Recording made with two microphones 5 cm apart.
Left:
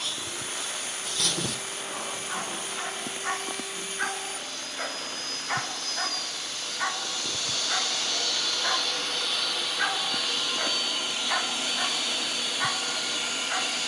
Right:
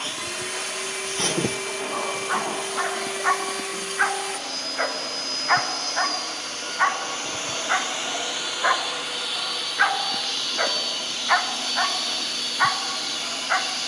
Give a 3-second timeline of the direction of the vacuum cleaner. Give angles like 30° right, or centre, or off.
80° right, 70° right, 30° right, 10° left, 10° left.